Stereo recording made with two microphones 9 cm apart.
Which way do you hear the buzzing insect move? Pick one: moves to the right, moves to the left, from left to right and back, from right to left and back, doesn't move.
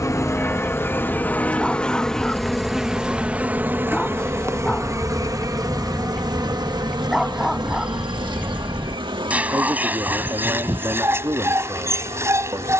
moves to the right.